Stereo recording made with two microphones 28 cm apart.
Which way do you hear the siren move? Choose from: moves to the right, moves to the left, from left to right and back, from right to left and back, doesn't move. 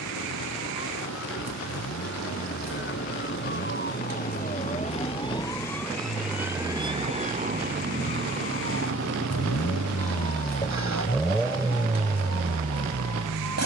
moves to the right.